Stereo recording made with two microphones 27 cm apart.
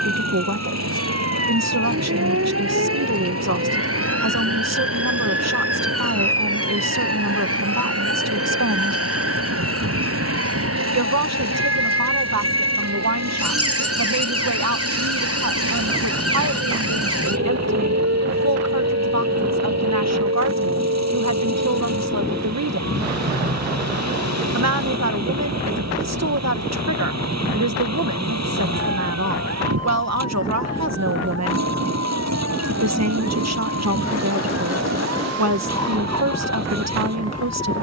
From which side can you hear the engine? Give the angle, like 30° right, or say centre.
80° right.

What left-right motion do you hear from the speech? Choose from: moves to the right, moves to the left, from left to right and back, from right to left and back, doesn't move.
doesn't move.